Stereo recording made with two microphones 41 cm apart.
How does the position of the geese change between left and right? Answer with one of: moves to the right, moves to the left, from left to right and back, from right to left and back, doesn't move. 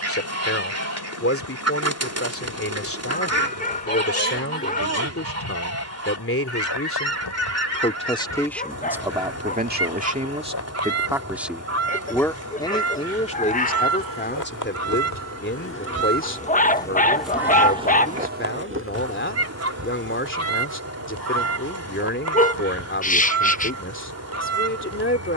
doesn't move.